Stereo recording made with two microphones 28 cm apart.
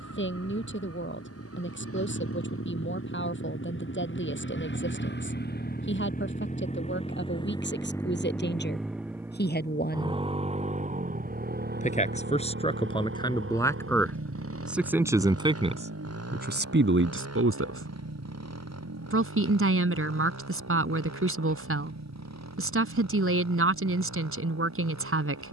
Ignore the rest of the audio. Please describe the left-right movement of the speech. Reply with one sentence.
You can hear the speech move from left to right.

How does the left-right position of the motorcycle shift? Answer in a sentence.
In this clip you hear the motorcycle move from left to right.